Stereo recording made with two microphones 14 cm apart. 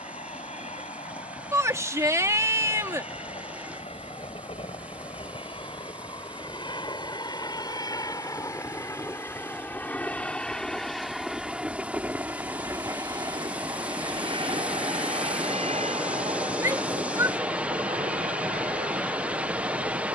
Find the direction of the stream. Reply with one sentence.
In this clip you hear the stream in the centre.